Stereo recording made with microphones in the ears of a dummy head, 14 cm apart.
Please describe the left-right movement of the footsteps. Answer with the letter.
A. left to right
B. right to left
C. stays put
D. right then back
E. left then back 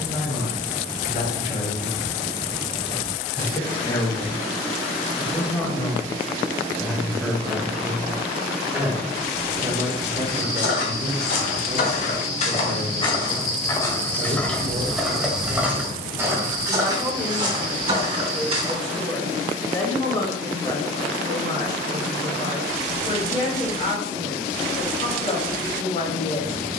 A.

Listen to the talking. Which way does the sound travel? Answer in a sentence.
In this clip you hear the talking go right and come back.